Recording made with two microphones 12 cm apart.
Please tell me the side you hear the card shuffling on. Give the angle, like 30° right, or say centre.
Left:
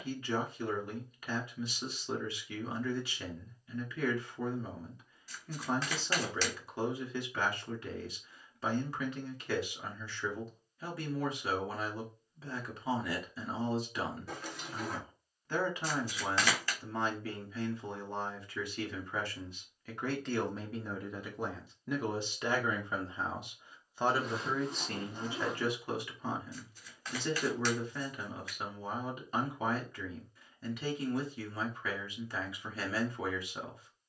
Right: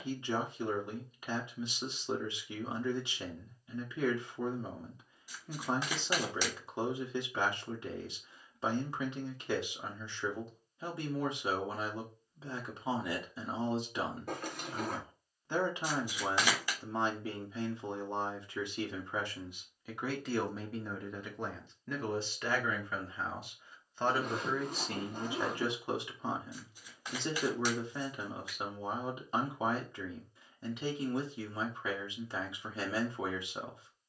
10° right.